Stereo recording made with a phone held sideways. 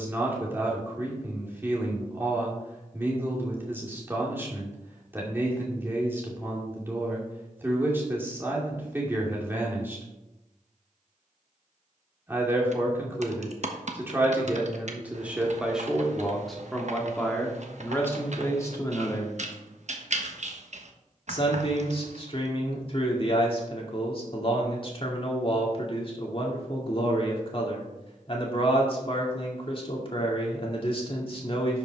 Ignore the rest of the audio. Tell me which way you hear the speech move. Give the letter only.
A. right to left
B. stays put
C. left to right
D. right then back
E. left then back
A.